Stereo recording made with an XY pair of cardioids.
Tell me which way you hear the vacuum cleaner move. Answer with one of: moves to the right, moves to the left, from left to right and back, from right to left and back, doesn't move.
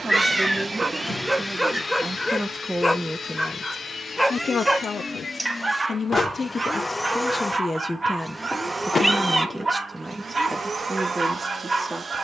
from right to left and back.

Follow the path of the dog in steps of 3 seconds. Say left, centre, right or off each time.
centre, centre, right, right.